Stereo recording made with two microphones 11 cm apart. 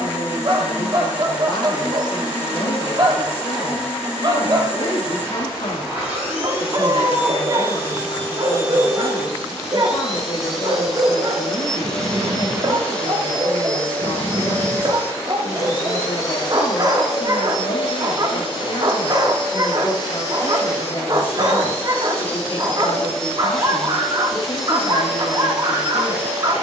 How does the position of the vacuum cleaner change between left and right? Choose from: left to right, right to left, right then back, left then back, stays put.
left then back.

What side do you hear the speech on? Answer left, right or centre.
left.